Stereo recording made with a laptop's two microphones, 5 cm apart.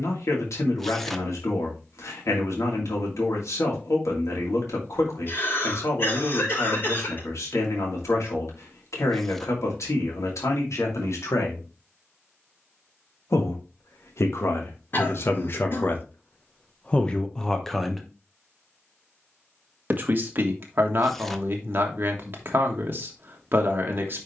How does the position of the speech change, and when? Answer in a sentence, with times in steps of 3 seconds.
You can hear the speech on the left from 0 s and on the right from 18 s.